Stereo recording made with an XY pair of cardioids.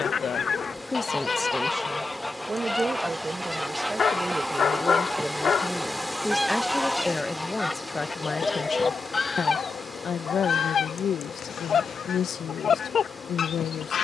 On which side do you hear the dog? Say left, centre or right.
left.